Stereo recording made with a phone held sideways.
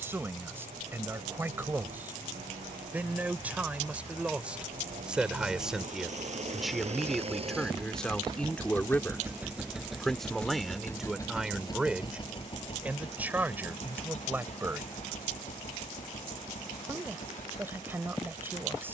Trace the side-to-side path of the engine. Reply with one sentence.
In this clip you hear the engine move from right to left.